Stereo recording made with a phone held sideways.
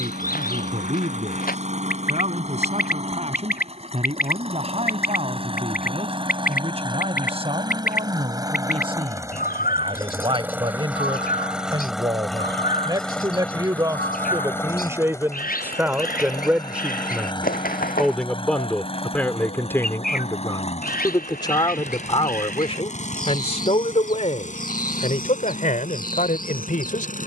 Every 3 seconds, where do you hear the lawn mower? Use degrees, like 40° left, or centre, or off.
50° right, 40° right, 30° right, 10° right, 10° left, 30° left, 40° left, 50° left, 60° left.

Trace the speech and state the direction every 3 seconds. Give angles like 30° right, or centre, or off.
50° right, 40° right, 40° right, 30° right, 20° right, 10° right, 10° left, 40° left, 60° left.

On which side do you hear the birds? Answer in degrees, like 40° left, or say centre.
80° left.